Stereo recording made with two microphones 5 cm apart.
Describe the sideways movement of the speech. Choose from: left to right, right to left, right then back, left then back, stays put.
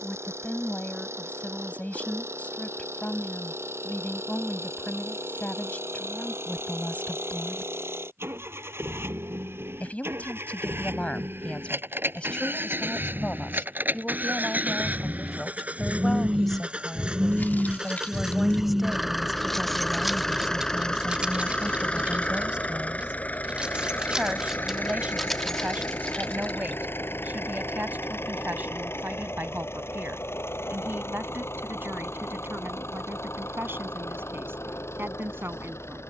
left to right.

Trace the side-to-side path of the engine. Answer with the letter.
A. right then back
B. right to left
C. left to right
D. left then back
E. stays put
B.